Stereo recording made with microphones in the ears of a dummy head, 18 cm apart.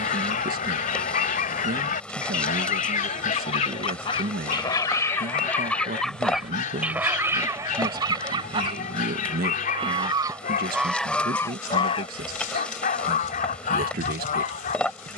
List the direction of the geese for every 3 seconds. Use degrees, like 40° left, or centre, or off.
40° left, 20° left, 10° right, centre, 40° left.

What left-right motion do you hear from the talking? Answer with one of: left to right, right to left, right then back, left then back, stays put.
stays put.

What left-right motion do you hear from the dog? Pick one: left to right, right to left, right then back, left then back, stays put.
stays put.